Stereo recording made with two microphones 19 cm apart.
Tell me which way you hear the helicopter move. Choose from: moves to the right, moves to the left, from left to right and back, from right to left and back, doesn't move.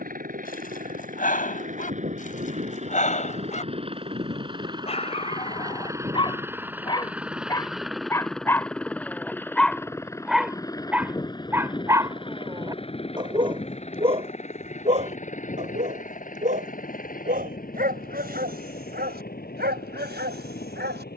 moves to the left.